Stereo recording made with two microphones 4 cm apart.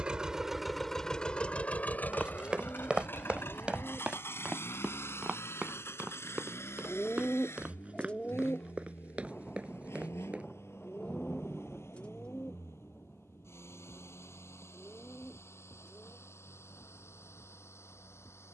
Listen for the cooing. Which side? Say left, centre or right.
left.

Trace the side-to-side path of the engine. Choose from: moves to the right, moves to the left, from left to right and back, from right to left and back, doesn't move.
moves to the left.